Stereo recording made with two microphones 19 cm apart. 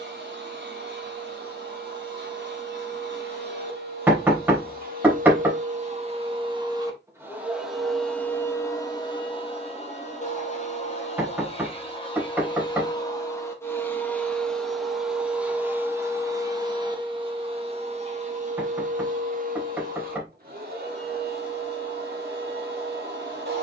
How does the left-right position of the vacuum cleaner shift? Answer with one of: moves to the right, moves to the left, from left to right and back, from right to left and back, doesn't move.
from right to left and back.